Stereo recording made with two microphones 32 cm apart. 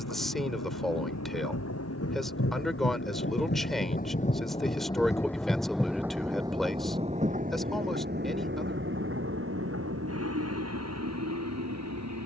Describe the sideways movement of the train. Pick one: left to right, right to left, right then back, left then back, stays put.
left to right.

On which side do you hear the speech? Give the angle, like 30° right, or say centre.
centre.